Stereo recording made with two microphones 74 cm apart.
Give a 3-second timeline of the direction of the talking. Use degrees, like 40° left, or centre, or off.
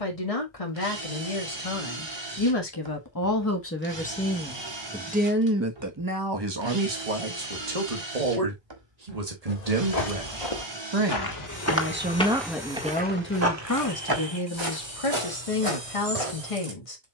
40° left, centre, 40° right, 40° right, 20° left, 40° left.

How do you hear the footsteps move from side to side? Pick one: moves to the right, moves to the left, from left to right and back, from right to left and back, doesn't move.
moves to the right.